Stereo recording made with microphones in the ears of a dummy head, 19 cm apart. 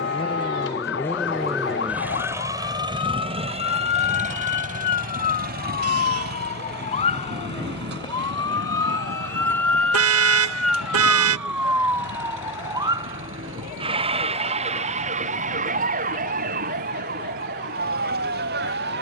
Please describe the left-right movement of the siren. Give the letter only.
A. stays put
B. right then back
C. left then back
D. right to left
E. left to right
E.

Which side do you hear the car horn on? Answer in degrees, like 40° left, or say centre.
80° right.